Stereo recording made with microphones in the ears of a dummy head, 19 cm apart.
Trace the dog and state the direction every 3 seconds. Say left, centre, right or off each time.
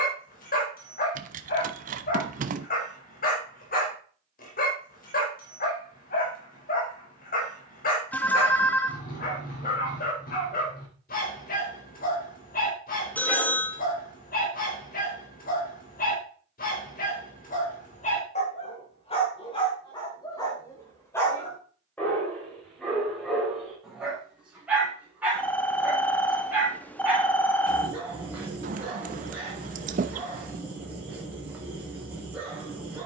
left, left, left, left, left, left, left, centre, centre, centre, centre.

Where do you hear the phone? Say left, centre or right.
centre.